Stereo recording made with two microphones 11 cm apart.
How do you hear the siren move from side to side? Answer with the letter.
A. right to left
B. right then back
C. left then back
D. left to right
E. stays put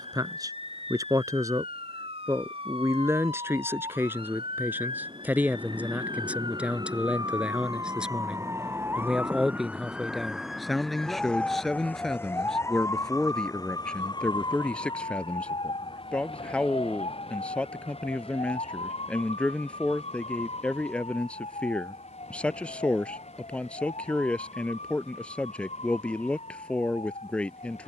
A.